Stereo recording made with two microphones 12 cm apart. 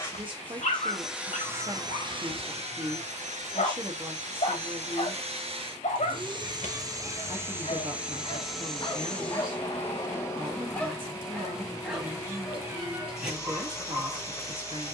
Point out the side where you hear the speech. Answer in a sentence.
You can hear the speech on the right.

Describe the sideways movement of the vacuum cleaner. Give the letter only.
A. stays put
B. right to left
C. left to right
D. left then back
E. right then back
E.